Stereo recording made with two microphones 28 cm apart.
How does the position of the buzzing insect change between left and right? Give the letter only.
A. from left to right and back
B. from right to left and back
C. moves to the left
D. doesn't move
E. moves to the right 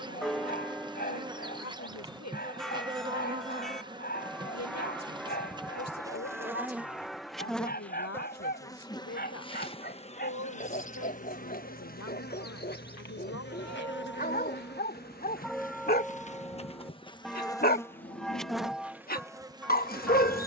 B.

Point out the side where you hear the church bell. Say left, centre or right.
centre.